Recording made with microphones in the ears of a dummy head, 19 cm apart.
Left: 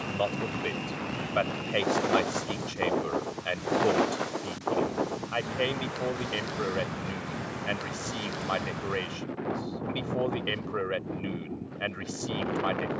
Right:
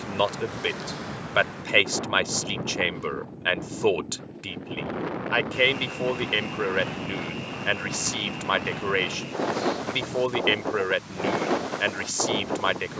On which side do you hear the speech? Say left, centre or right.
right.